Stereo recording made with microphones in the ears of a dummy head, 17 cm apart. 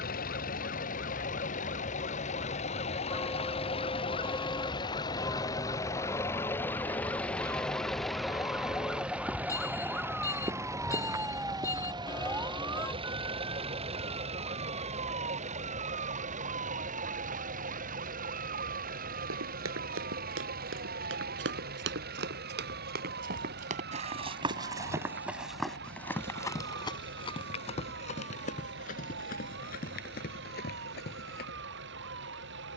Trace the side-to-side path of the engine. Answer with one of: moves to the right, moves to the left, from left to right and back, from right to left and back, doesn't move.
moves to the right.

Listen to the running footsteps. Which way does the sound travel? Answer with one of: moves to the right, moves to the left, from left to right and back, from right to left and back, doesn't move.
moves to the left.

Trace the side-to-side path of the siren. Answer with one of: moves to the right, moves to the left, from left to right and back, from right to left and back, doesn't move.
moves to the right.